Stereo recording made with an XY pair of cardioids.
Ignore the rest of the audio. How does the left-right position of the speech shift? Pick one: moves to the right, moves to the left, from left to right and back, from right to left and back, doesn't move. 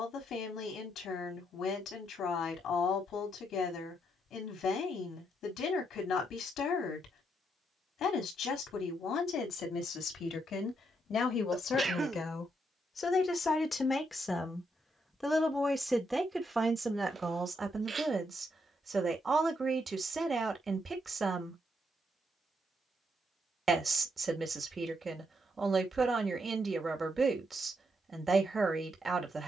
moves to the right.